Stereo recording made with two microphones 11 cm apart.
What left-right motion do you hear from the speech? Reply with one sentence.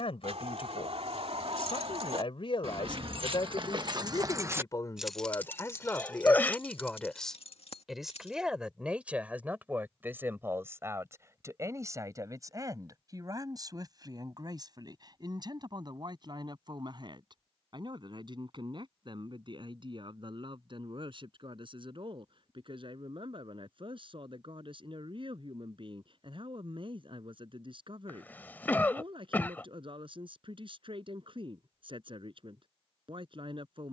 In this clip you hear the speech move to the right.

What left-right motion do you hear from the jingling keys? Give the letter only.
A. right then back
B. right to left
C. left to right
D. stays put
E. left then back
B.